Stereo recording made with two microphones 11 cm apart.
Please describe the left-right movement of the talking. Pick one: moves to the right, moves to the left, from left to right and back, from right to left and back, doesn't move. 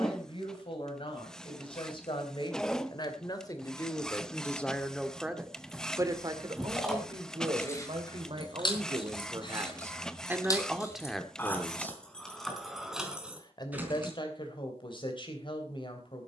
from left to right and back.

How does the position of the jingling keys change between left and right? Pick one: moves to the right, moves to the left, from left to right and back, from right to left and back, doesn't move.
from right to left and back.